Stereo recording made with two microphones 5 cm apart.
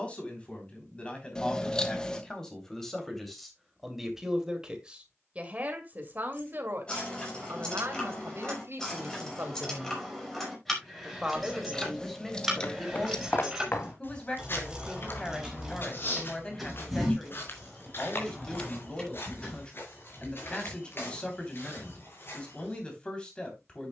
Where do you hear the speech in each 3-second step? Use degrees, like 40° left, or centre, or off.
20° left, 10° right, 50° right, 30° right, 10° left, 20° left, 20° left, 20° left.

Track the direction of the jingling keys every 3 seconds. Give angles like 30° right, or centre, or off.
off, off, 20° left, 10° left, 10° right, centre, 20° left, off.